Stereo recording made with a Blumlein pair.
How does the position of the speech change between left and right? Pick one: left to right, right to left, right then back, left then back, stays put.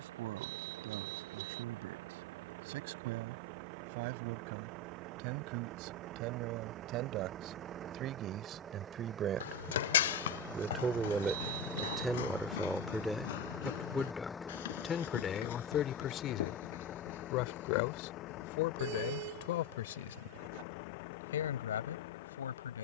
right to left.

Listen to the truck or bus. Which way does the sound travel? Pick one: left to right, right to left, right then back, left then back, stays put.
right to left.